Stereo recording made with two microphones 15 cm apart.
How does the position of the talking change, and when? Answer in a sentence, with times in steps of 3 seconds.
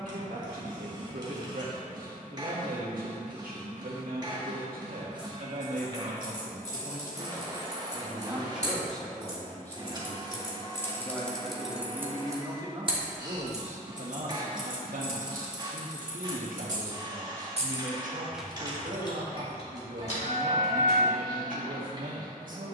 You can hear the talking on the right from 0 s, in the centre from 9 s and on the right from 12 s.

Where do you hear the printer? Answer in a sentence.
In this clip you hear the printer on the right.